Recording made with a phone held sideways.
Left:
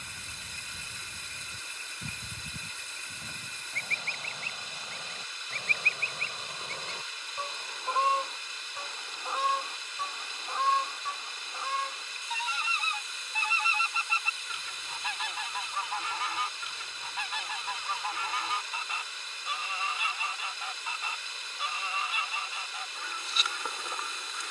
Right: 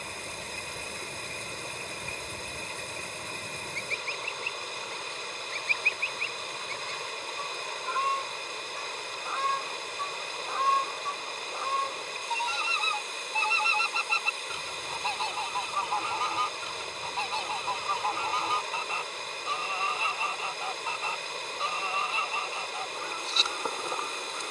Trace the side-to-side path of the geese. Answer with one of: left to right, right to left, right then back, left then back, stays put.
left to right.